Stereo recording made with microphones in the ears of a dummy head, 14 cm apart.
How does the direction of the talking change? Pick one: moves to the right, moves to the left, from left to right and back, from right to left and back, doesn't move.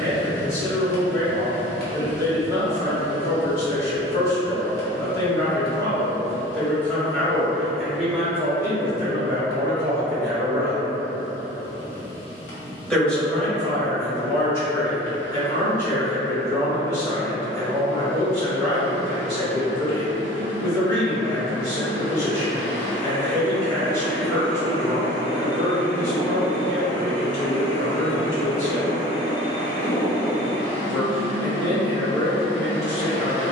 from left to right and back.